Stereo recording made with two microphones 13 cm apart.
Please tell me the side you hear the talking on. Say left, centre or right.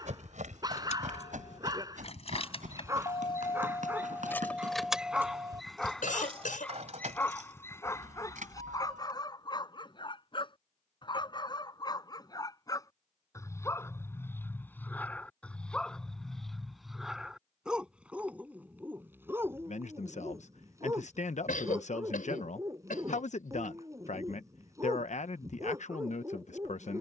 left.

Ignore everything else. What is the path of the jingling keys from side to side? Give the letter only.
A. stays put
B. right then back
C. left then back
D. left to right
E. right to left
D.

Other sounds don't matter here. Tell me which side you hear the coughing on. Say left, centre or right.
left.